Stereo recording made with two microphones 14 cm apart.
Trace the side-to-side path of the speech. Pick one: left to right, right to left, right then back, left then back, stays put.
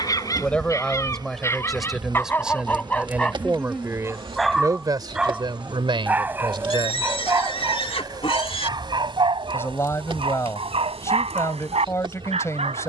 right then back.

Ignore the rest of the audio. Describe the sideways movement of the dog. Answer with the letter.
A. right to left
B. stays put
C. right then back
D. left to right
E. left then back
D.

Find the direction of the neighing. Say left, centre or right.
left.